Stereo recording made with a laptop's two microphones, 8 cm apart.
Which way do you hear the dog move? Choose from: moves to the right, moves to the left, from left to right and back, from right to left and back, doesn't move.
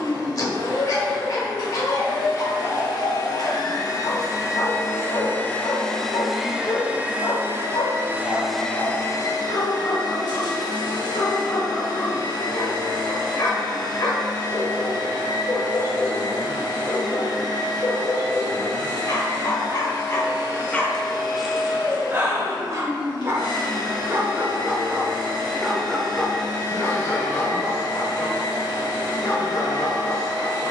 from left to right and back.